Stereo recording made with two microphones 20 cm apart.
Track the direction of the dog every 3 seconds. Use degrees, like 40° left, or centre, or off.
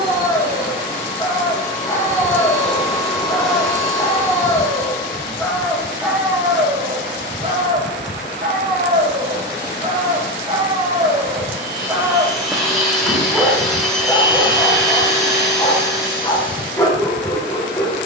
20° left, 10° left, 30° right, 30° right, centre, 20° left.